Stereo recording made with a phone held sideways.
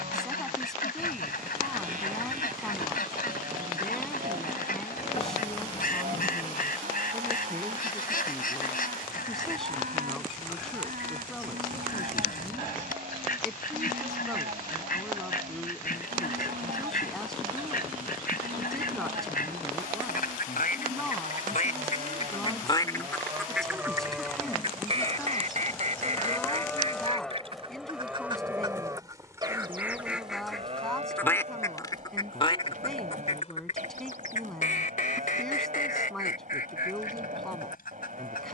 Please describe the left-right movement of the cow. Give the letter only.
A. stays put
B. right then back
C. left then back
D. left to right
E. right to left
C.